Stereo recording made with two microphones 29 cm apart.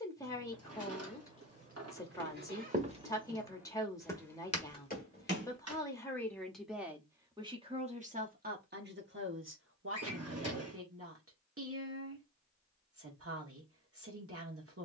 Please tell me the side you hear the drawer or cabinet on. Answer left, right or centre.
right.